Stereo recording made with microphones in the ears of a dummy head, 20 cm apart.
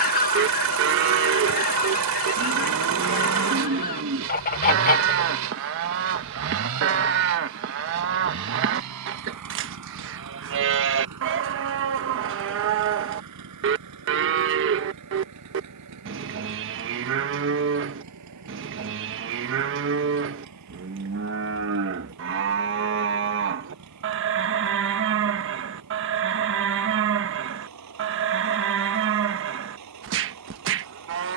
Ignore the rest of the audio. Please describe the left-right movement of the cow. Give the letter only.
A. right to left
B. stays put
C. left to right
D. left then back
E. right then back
B.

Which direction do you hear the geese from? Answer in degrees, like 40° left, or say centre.
40° left.